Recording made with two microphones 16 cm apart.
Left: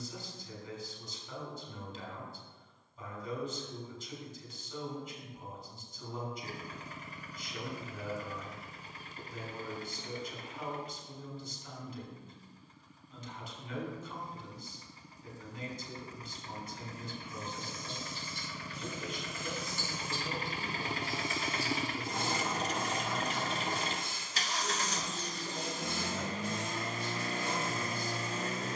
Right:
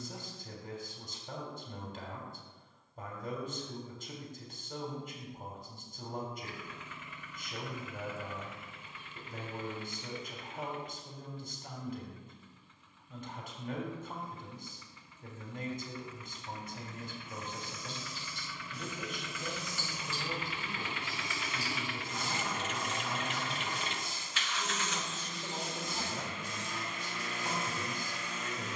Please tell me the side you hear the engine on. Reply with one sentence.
You can hear the engine on the left.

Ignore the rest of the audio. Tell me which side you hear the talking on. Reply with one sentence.
In this clip you hear the talking on the right.